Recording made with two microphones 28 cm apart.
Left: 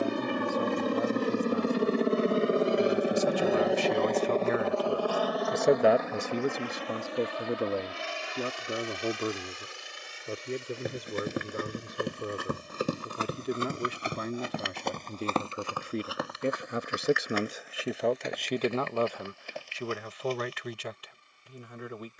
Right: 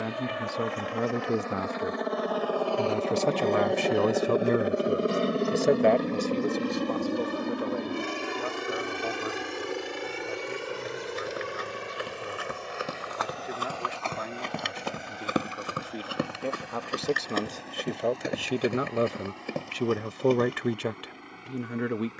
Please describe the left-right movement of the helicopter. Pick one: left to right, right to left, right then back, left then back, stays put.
left to right.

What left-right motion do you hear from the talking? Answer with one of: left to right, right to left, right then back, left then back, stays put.
left then back.